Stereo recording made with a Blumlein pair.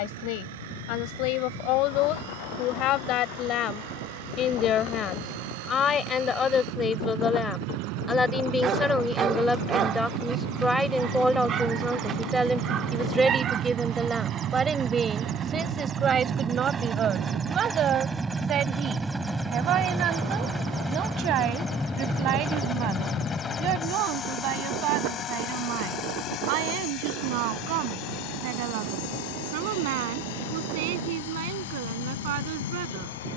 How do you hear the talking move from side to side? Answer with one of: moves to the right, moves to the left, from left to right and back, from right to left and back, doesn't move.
moves to the right.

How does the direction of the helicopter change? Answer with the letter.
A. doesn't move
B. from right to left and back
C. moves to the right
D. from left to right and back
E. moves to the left
E.